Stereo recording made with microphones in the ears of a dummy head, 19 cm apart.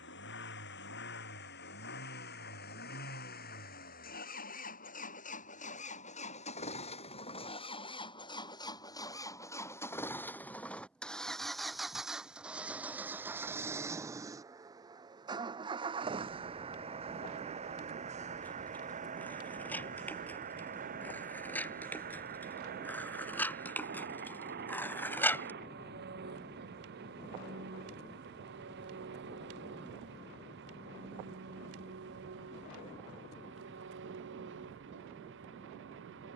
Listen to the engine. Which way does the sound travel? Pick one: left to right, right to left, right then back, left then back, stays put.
left to right.